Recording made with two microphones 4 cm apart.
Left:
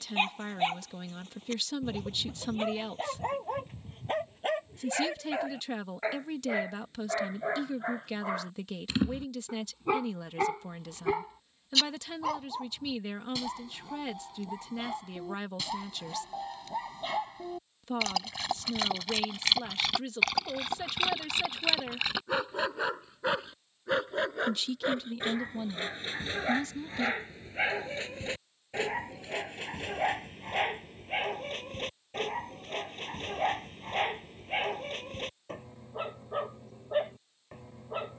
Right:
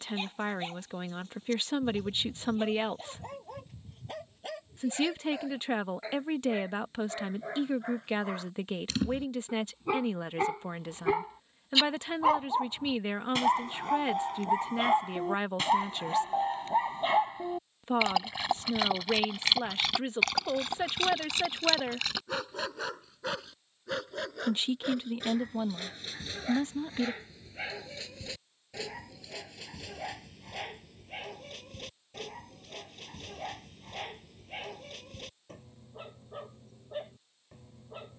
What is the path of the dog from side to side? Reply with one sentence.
You can hear the dog move from left to right and back again.